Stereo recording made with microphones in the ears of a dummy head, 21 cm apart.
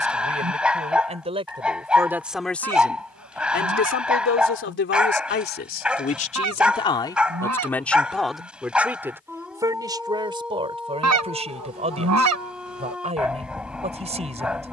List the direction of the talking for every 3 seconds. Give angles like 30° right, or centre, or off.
20° right, 50° left, 10° left, 20° right, 30° right.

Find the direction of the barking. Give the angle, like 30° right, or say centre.
centre.